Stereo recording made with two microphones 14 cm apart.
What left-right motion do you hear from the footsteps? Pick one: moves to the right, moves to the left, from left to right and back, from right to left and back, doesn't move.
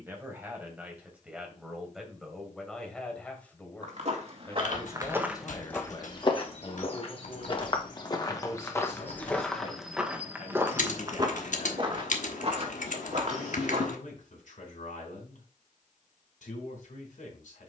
from right to left and back.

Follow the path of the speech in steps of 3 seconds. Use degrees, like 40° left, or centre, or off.
10° right, 20° left, 40° left, 60° left, 70° left, 70° left.